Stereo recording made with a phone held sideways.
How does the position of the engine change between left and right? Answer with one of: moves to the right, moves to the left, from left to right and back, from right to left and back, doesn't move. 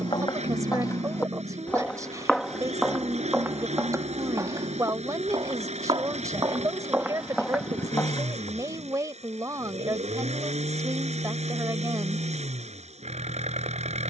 doesn't move.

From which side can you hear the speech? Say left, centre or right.
right.